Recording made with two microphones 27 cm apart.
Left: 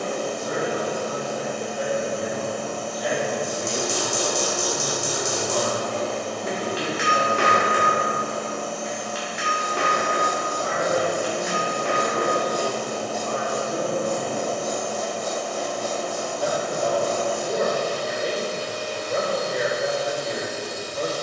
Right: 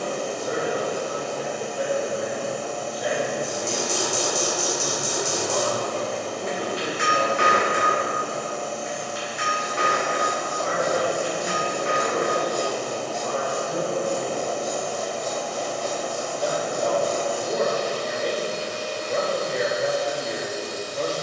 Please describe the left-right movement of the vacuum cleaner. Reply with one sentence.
You can hear the vacuum cleaner stay in one place.